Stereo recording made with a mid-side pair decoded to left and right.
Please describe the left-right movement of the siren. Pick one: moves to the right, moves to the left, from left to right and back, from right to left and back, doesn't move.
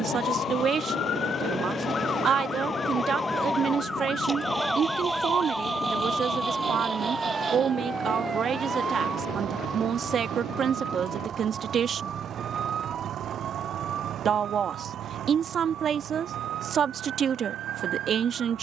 moves to the right.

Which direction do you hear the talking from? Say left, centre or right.
right.